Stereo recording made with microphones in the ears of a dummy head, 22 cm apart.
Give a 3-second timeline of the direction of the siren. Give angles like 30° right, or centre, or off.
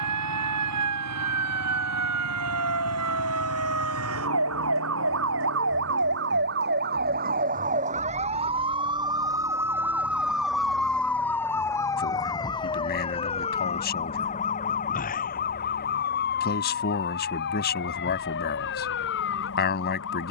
70° right, 60° right, 30° right, centre, 20° left, 40° left, 50° left.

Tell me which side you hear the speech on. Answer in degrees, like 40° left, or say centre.
40° left.